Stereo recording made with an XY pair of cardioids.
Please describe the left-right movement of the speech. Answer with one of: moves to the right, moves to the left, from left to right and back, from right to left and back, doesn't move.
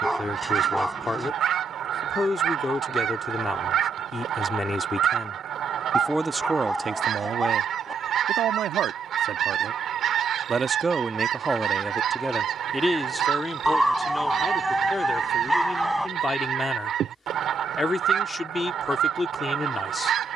from left to right and back.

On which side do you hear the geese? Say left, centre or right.
right.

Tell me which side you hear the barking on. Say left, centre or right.
centre.